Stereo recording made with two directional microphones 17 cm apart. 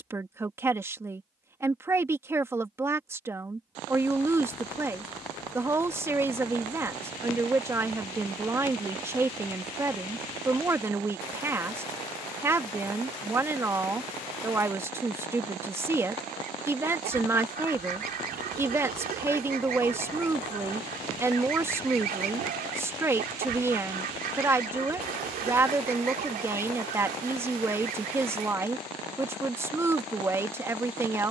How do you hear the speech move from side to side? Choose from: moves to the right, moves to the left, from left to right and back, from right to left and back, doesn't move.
doesn't move.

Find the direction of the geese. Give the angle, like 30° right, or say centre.
60° right.